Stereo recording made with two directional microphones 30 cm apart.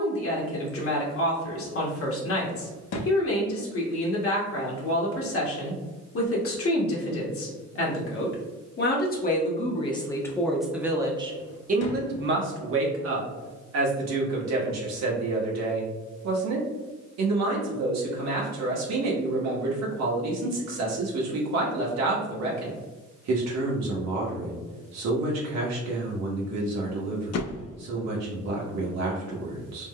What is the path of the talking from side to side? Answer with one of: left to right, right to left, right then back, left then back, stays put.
left to right.